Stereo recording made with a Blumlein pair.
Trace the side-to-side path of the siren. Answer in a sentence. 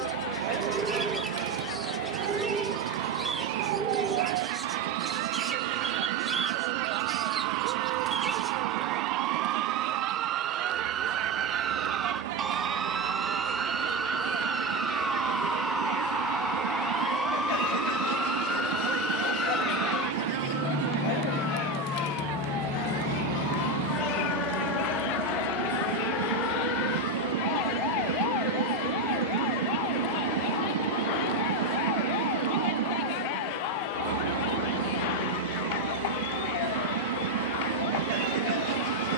In this clip you hear the siren go from the right side to the left.